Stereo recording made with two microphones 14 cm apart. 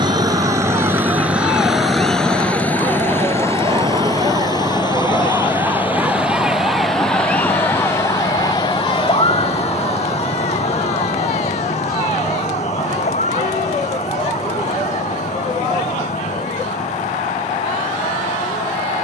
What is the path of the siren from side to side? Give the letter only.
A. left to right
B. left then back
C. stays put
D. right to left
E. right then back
D.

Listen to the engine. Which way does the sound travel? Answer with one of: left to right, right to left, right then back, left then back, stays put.
right to left.